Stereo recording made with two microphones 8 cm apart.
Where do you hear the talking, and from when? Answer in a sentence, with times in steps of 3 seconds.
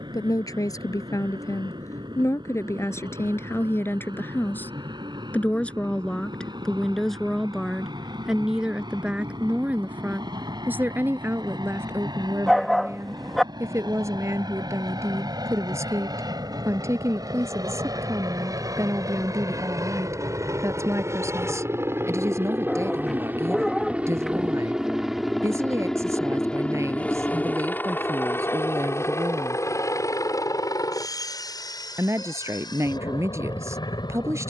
In this clip you hear the talking on the left from 0 s, in the centre from 6 s and on the right from 9 s.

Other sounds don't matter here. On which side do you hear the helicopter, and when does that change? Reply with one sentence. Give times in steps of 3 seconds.
You can hear the helicopter on the right from 0 s, in the centre from 24 s and on the left from 27 s.